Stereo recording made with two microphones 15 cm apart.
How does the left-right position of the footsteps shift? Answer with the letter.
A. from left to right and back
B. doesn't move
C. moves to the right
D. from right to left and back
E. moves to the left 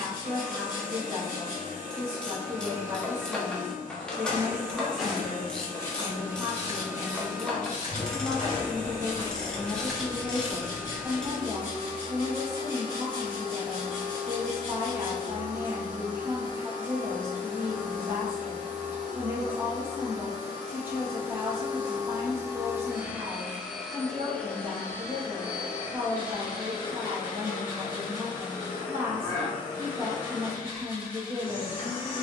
D.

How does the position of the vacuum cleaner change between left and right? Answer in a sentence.
You can hear the vacuum cleaner move from right to left.